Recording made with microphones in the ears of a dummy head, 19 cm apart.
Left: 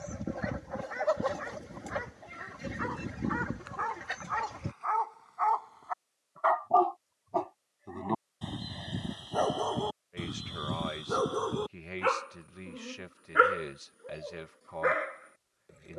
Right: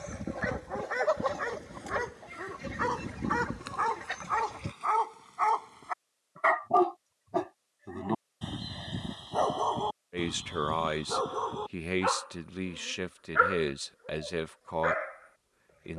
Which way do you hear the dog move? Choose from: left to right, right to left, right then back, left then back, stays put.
right to left.